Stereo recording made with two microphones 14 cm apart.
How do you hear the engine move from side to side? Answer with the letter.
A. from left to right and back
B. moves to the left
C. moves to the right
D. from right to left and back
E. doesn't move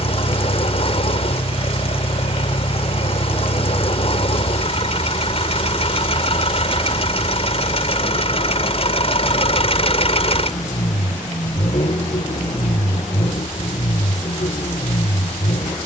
E.